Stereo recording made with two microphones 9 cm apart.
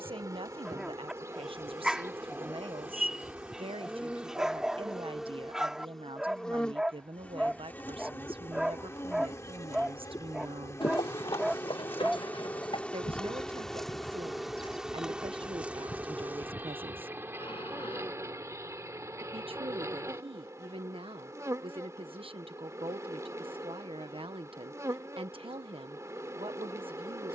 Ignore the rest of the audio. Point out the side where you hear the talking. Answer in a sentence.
You can hear the talking on the right.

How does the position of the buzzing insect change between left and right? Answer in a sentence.
In this clip you hear the buzzing insect go left and come back.